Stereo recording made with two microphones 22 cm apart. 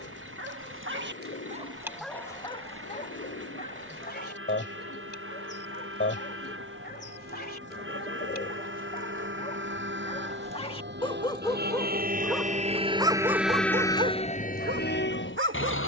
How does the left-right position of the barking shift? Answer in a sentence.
You can hear the barking move from right to left and back again.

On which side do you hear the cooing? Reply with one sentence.
You can hear the cooing on the left.